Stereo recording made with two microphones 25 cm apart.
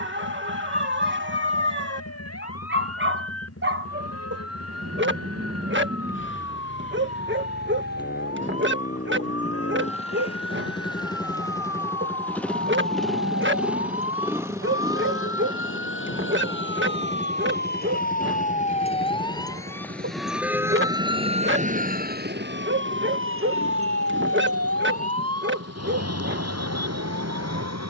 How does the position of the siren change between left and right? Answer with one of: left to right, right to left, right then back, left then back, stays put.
left to right.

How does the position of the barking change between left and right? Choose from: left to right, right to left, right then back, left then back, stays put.
stays put.